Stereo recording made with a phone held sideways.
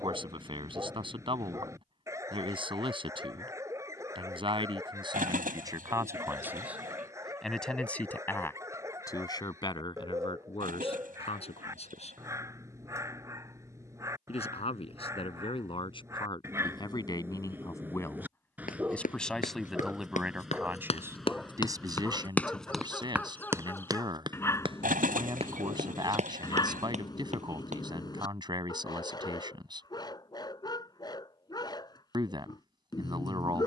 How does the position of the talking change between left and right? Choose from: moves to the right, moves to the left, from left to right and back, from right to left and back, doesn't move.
from right to left and back.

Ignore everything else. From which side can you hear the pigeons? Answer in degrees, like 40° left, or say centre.
70° right.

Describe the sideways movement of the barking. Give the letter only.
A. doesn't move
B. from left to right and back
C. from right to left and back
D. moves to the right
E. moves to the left
E.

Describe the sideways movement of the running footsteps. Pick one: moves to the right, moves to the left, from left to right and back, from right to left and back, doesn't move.
moves to the right.